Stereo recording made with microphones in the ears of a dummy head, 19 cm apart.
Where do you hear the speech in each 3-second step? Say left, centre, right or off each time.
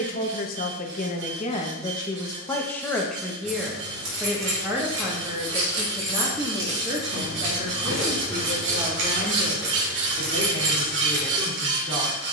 left, centre, right, right.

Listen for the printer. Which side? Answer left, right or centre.
right.